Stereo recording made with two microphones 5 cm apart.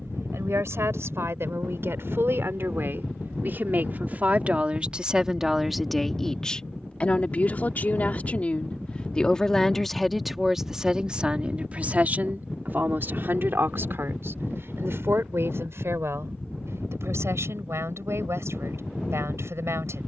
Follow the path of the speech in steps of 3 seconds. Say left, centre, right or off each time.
right, right, left, centre, right, right, right.